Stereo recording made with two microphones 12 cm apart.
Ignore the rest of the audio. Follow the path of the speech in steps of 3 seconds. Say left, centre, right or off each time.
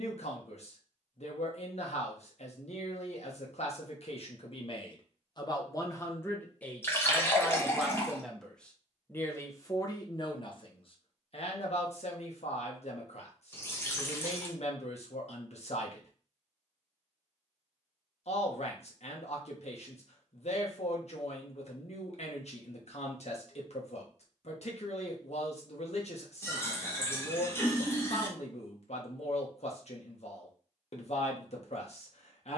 left, left, centre, left, left, left, left, left, left, left, left.